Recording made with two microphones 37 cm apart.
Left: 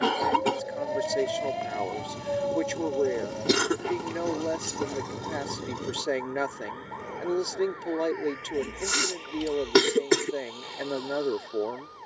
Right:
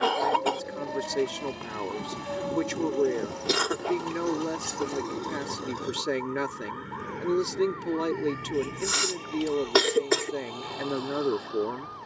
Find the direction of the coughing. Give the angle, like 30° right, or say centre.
30° left.